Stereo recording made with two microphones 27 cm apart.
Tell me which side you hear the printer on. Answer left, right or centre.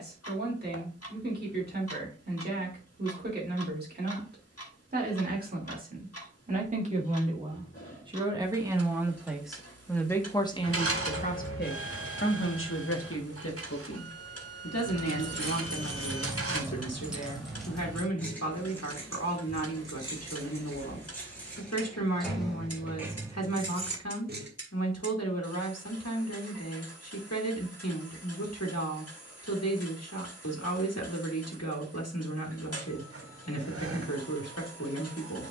right.